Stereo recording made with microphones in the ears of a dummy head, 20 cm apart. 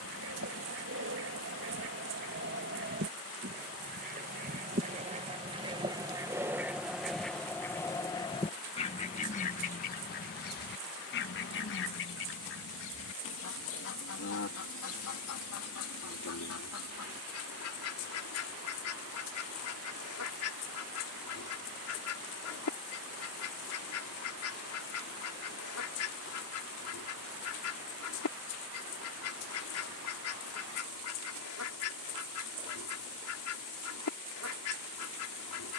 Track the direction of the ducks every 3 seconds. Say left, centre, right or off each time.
right, right, centre, left, left, left, left, left, left, left, left, left.